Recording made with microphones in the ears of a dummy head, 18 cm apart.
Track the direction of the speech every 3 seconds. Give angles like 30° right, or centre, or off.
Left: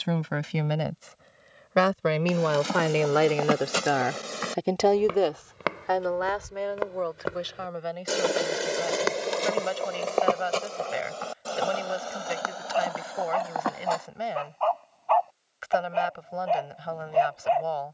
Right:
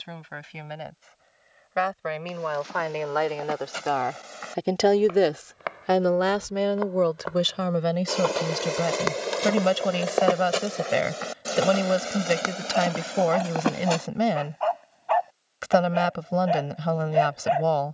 60° left, 10° left, 60° right, 70° right, 70° right, 70° right.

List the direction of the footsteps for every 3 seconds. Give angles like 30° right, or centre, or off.
80° left, 60° left, 30° left, 10° right, 30° right, off.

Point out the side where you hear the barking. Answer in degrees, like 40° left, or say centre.
10° right.